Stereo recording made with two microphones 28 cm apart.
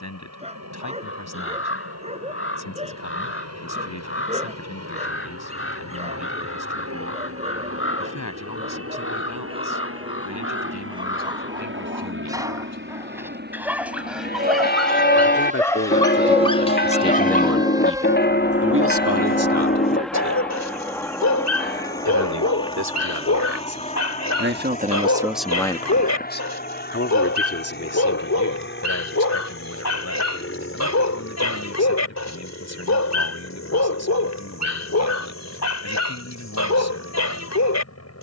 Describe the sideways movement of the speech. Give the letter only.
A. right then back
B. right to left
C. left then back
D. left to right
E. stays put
A.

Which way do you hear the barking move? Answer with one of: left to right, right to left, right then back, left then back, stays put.
right to left.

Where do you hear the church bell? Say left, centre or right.
left.